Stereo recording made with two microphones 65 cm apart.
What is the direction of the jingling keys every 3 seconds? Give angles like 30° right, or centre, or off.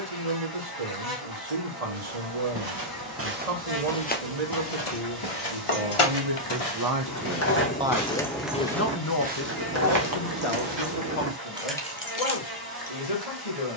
off, 60° left, 20° left, 20° right, 40° left.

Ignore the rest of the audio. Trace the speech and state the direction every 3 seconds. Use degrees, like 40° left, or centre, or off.
70° right, 60° right, 20° right, 50° left, 70° left.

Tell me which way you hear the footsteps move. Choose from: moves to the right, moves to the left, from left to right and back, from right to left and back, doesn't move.
from right to left and back.